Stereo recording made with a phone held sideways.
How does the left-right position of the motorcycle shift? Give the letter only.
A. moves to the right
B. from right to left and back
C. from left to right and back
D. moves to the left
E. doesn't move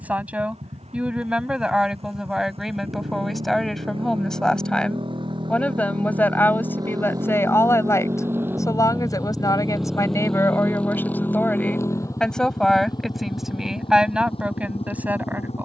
D.